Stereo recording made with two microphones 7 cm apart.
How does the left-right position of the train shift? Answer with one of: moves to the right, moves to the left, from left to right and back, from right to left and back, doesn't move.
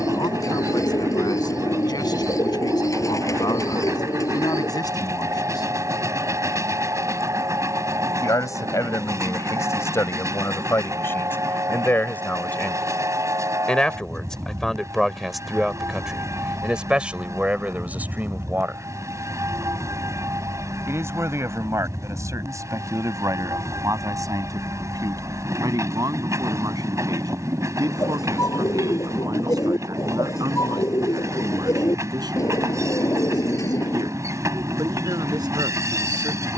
doesn't move.